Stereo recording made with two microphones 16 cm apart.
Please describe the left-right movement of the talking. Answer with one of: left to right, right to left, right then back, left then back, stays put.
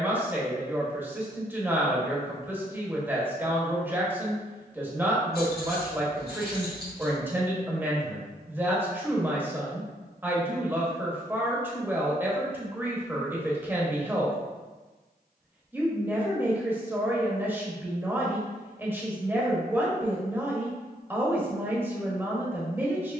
stays put.